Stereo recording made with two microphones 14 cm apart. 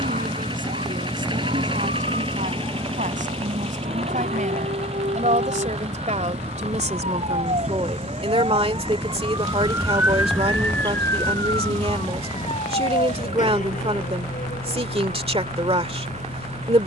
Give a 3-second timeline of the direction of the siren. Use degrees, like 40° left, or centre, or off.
80° right, 70° right, 50° right, centre, 60° left, 70° left.